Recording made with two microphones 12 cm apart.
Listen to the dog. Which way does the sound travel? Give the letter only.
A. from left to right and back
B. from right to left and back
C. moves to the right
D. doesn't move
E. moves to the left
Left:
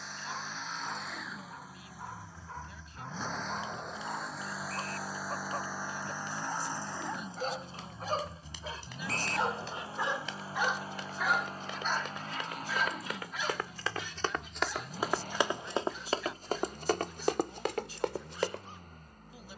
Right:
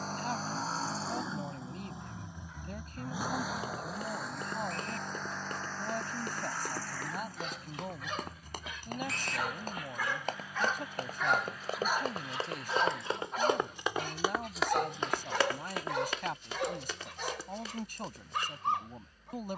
C.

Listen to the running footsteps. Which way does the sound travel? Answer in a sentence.
In this clip you hear the running footsteps travel towards the left.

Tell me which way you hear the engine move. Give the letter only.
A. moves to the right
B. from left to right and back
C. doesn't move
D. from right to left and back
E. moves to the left
E.